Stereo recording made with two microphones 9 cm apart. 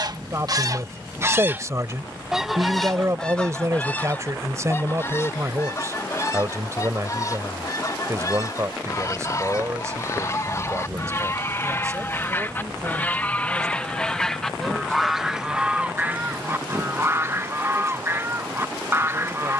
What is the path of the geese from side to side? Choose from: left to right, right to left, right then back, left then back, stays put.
left then back.